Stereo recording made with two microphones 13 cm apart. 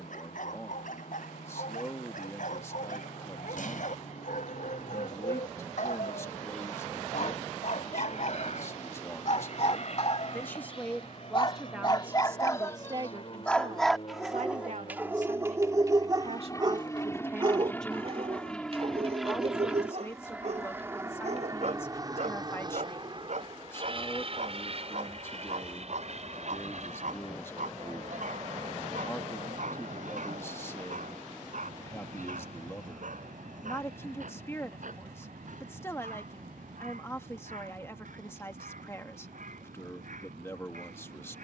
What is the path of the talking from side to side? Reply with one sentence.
In this clip you hear the talking move from left to right and back again.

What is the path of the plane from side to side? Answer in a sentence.
You can hear the plane go from the left side to the right.